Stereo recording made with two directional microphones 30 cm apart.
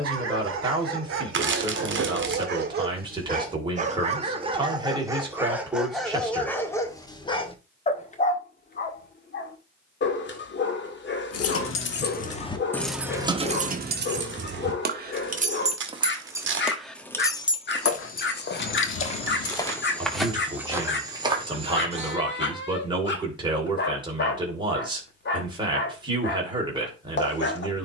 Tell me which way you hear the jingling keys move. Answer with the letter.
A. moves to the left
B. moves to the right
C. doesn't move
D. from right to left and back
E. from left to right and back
E.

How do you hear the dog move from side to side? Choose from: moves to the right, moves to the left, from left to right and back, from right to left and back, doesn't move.
moves to the left.